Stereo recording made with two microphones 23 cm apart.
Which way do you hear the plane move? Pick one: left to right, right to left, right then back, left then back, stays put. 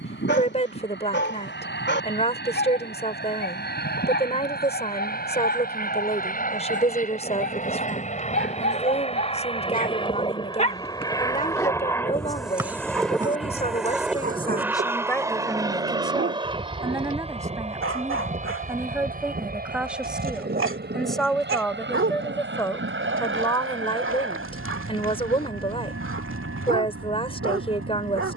left to right.